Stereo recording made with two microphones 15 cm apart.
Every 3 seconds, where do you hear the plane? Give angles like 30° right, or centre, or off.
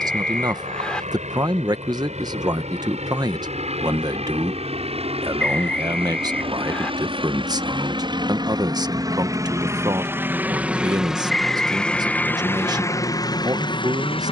60° right, 50° right, 40° right, 10° right, 20° left.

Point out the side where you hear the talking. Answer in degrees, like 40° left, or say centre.
30° right.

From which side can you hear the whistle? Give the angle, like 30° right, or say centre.
10° left.